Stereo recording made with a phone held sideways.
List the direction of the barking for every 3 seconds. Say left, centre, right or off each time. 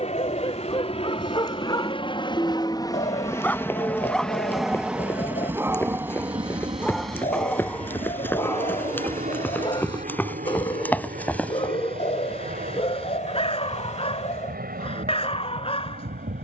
left, centre, centre, left, left, left.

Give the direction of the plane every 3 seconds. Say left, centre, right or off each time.
left, centre, right, right, right, right.